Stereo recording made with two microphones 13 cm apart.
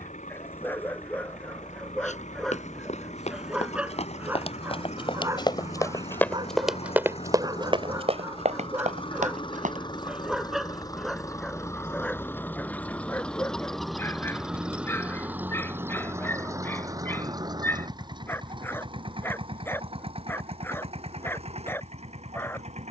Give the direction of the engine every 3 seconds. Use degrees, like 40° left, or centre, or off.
70° left, 60° left, 50° left, 30° left, centre, 20° right, 40° right, 50° right.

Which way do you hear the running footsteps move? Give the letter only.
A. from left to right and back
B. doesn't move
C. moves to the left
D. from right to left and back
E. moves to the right
E.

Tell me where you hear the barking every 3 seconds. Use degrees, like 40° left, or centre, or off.
10° left, 10° right, 30° right, centre, 10° left, 20° left, 20° left, 20° left.